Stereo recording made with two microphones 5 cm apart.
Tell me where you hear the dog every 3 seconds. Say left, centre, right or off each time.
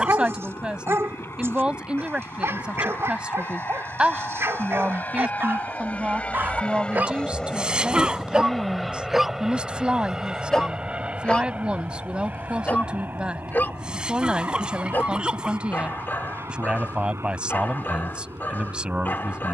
right, right, right, centre, left, left, left.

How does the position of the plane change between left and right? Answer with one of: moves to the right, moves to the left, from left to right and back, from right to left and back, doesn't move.
moves to the right.